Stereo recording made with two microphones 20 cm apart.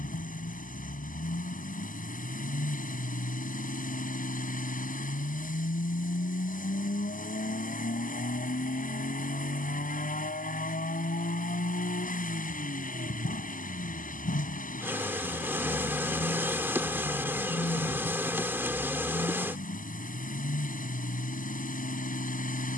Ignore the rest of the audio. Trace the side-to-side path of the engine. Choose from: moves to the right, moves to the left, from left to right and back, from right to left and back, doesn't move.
doesn't move.